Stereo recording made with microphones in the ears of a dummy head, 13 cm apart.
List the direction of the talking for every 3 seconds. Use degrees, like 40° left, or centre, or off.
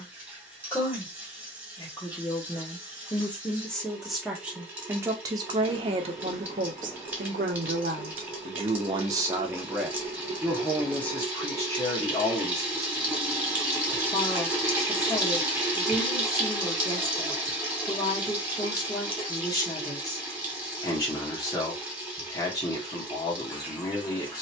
20° left, 10° right, 50° right, centre, 20° left, 20° left, 20° left, 20° left.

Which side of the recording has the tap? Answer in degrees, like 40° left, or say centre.
10° right.